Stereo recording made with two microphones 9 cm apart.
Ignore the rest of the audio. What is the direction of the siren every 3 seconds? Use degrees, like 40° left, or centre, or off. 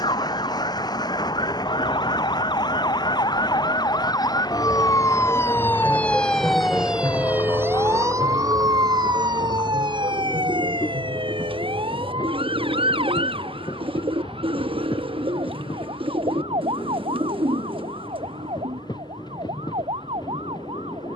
60° left, 40° left, 20° right, 60° right, 70° right, 80° right, 80° right.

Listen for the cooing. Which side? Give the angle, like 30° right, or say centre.
70° right.